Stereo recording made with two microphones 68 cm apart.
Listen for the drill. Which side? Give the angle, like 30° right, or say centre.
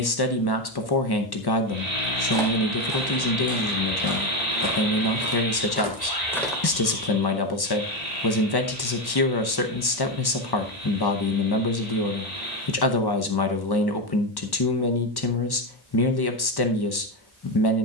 70° left.